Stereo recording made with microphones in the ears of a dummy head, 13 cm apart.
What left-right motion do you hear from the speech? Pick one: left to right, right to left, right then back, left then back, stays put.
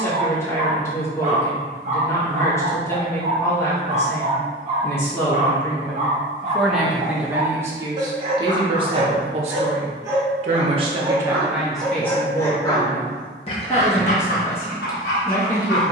right then back.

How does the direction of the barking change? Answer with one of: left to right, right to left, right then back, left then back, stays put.
right to left.